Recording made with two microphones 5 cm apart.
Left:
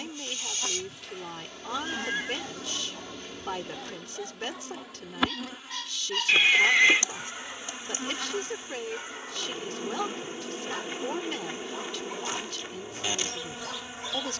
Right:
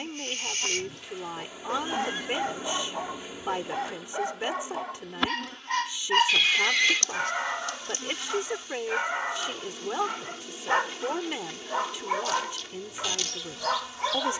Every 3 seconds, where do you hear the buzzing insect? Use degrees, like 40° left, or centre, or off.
10° right, centre, 20° left, 20° left, 20° left.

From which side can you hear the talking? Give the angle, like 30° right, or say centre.
20° right.